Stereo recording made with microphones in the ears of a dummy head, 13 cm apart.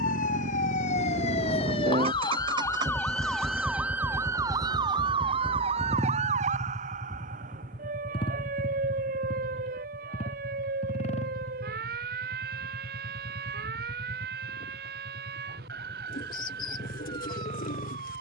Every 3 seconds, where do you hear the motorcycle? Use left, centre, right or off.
right, centre, left, left, left, left.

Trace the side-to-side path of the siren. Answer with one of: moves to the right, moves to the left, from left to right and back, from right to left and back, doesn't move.
moves to the right.